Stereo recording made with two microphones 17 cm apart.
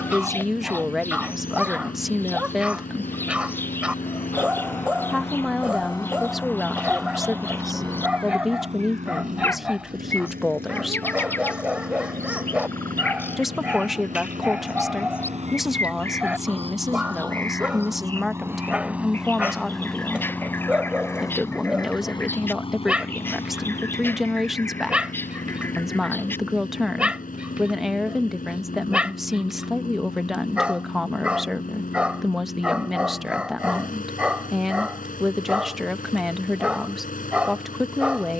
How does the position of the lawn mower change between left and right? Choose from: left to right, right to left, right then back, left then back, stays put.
right then back.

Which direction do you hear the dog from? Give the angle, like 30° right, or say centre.
10° right.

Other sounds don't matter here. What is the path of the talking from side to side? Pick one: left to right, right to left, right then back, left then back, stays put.
stays put.